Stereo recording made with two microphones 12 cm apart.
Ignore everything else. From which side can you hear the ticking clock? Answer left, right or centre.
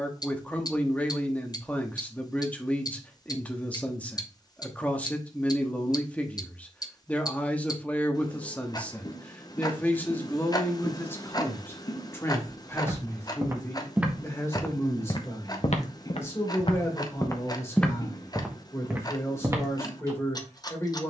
left.